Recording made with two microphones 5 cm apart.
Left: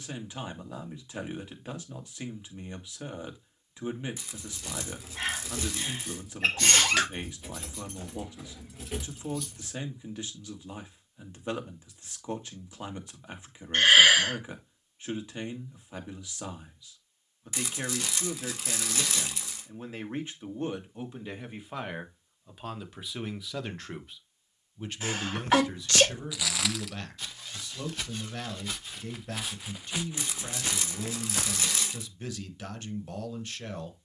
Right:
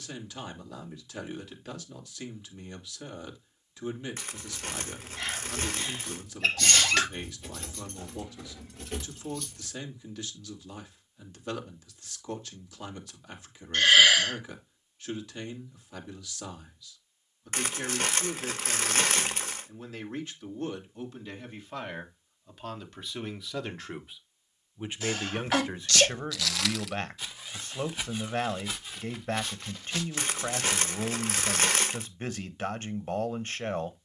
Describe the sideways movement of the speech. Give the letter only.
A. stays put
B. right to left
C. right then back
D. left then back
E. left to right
E.